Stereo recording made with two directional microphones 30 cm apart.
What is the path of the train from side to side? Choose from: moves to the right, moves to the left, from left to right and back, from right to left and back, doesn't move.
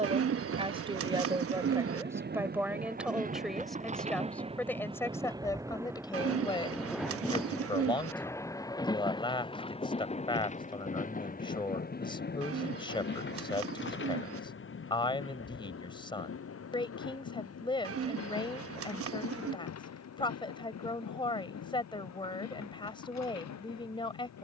moves to the left.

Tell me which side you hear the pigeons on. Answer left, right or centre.
right.